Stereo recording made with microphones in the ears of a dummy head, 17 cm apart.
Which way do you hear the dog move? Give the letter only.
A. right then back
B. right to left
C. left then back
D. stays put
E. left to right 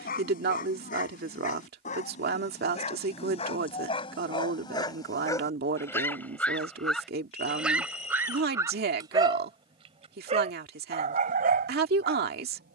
E.